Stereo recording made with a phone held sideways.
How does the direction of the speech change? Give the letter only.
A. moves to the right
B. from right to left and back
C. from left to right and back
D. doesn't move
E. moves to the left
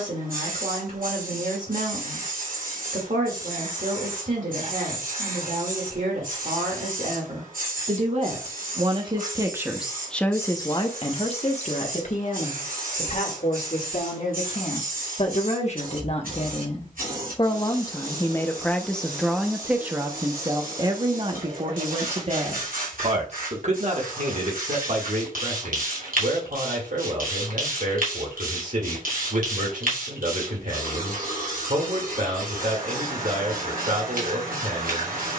B.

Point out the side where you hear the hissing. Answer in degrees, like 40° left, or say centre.
80° right.